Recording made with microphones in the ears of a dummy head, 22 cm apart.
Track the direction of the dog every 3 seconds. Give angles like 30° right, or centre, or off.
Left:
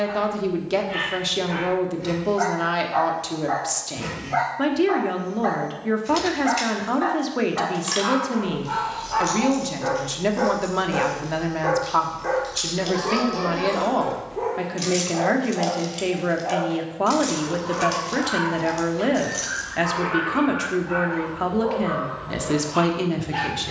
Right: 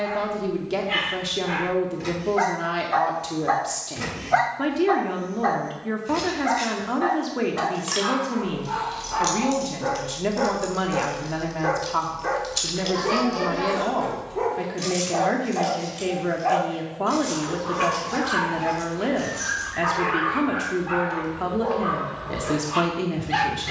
60° right, 40° right, 10° left, centre, 30° right, 50° right, 60° right, 60° right.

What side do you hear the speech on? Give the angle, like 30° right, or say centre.
20° left.